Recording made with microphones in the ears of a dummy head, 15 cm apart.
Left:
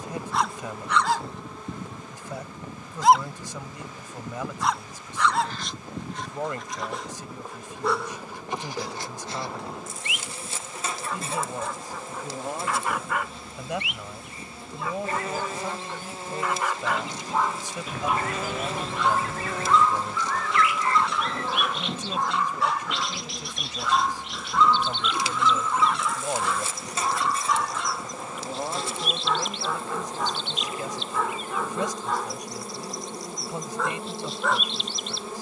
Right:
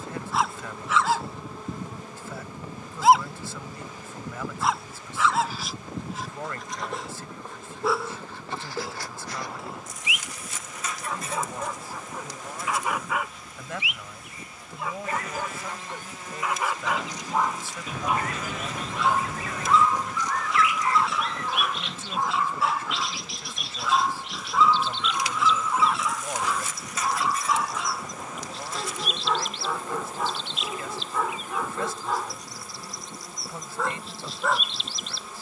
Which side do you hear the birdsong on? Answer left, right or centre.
centre.